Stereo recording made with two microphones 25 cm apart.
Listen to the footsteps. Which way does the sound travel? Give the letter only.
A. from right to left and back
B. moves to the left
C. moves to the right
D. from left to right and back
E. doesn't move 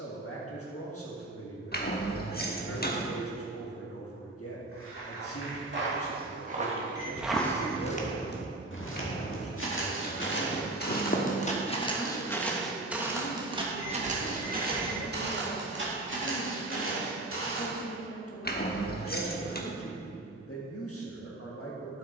A.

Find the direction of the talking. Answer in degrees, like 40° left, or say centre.
60° left.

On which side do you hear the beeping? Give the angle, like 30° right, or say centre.
40° left.